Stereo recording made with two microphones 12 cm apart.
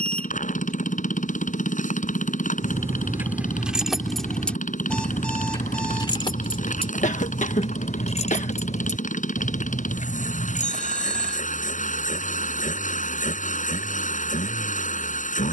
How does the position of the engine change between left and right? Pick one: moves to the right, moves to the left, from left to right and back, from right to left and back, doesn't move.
doesn't move.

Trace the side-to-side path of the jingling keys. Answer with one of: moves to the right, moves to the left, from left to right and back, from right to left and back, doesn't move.
moves to the left.